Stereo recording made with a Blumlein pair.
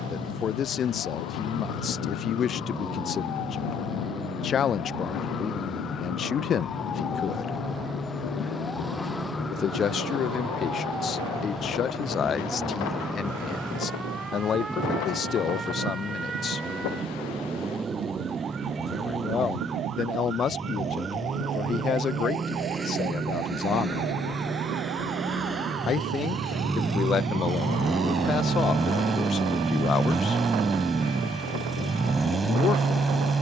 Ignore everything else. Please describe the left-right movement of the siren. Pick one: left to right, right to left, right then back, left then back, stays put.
left to right.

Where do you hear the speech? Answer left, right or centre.
left.